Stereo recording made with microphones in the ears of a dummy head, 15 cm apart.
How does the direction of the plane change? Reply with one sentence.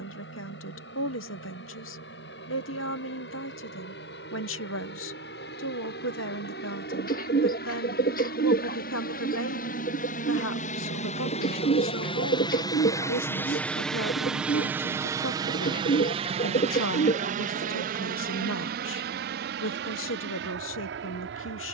In this clip you hear the plane move from left to right.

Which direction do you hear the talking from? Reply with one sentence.
You can hear the talking on the left.